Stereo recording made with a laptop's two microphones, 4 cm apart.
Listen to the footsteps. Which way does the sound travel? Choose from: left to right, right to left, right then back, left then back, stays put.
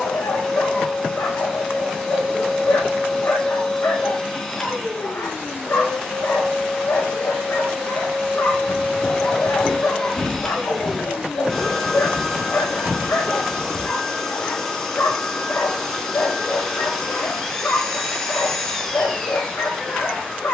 left to right.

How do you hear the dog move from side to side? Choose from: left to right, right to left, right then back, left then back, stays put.
stays put.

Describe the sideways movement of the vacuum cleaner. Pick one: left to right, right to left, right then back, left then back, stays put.
stays put.